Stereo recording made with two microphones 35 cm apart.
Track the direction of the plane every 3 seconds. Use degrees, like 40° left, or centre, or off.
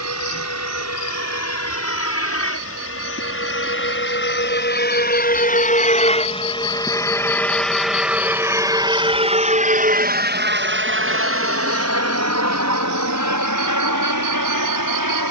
50° left, 30° left, centre, 30° right, 50° right.